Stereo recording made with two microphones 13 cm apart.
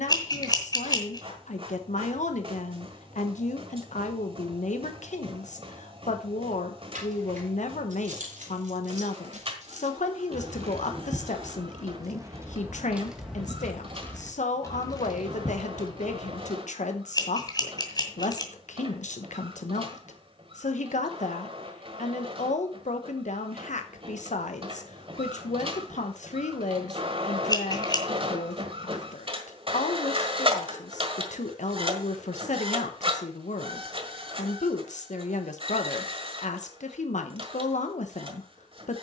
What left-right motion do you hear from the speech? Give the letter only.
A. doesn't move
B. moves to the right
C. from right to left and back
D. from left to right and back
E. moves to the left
A.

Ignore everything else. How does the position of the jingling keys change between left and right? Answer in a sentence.
You can hear the jingling keys travel towards the left.